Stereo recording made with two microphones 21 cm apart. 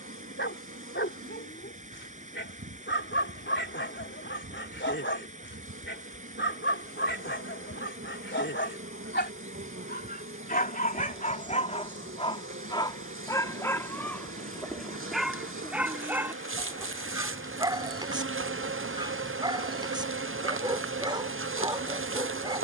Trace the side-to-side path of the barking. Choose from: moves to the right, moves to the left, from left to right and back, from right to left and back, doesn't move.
moves to the right.